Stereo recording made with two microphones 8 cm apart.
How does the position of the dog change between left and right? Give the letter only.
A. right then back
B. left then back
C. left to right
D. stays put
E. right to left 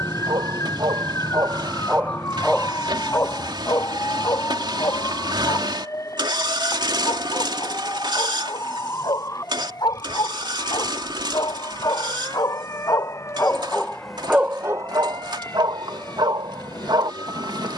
B.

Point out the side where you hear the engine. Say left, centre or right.
right.